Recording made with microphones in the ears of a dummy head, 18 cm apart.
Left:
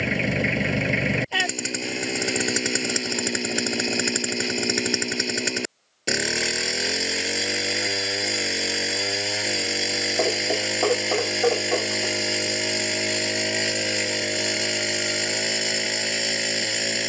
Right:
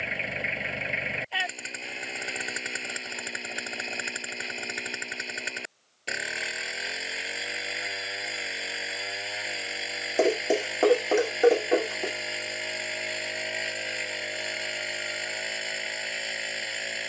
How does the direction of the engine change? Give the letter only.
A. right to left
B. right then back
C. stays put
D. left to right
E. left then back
C.